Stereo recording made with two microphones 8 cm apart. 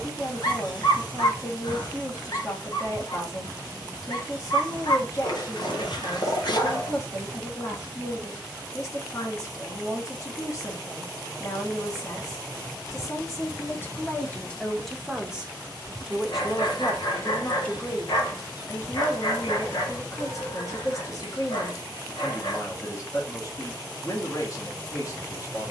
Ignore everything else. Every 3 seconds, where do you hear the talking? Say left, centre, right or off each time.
left, left, left, left, left, centre, left, left, left.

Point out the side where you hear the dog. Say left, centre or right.
left.